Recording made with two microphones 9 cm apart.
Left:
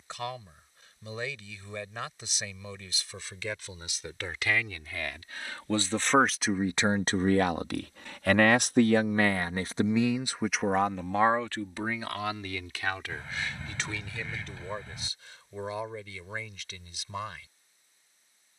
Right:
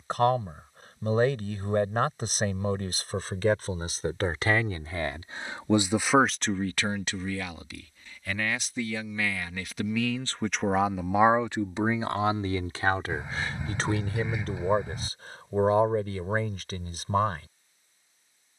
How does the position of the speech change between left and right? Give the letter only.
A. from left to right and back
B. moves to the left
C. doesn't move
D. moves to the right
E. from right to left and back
E.